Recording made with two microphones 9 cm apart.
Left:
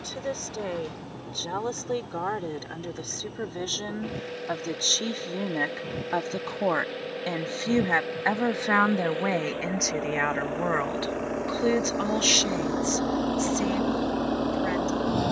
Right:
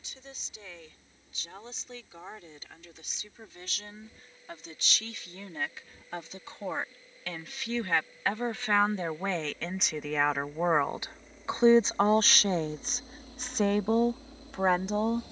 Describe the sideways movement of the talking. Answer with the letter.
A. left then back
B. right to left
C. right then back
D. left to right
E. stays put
D.